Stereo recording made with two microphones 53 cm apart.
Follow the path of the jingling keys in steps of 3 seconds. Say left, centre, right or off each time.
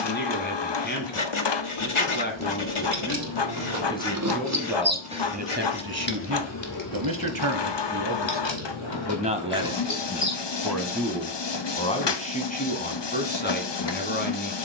right, right, left, left, off.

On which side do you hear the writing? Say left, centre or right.
left.